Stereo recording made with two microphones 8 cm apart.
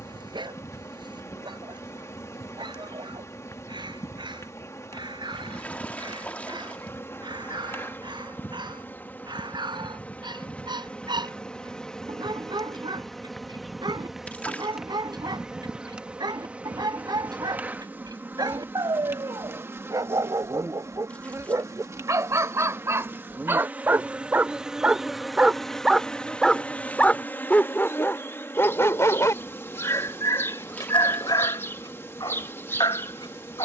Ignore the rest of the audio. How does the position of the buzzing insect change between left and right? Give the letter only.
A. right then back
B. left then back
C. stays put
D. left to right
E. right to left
A.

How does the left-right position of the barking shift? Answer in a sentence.
You can hear the barking travel towards the left.